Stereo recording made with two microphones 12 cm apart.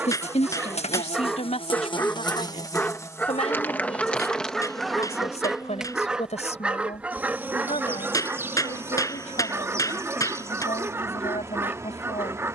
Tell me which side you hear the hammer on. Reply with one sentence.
In this clip you hear the hammer on the left.